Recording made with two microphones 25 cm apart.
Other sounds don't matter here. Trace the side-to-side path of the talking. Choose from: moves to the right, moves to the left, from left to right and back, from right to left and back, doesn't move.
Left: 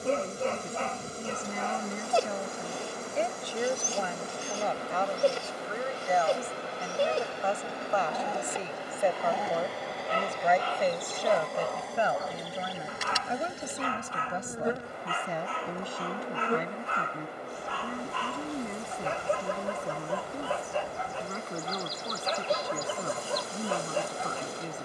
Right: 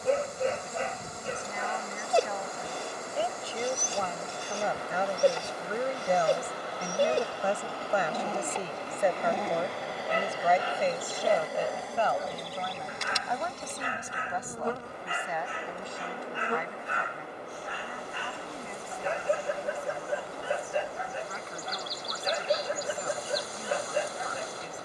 from left to right and back.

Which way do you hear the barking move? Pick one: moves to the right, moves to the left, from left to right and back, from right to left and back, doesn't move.
doesn't move.